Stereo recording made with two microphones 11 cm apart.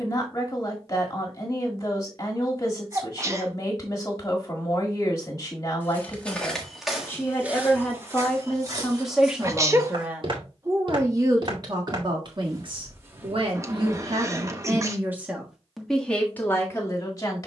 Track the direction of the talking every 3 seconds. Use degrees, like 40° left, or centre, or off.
30° left, 30° left, 10° left, 20° right, 40° right, 10° left.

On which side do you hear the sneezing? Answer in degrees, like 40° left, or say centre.
30° right.